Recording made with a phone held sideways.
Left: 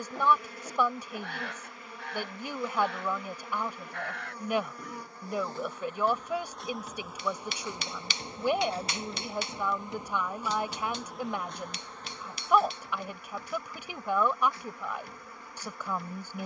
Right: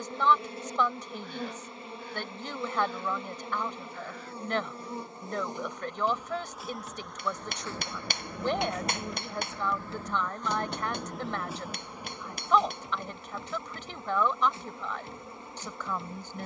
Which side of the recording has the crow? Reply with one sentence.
You can hear the crow on the left.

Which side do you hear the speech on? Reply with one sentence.
In this clip you hear the speech in the centre.